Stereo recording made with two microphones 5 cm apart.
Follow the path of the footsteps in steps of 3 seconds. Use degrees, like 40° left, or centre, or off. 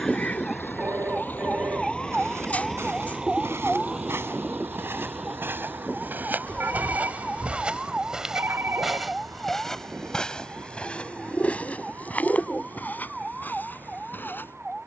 80° right, 60° right, 30° right, 20° left, 40° left.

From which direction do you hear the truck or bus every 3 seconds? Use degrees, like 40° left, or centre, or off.
30° left, 40° right, 70° right, 80° right, 80° right.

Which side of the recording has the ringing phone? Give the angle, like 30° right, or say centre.
60° right.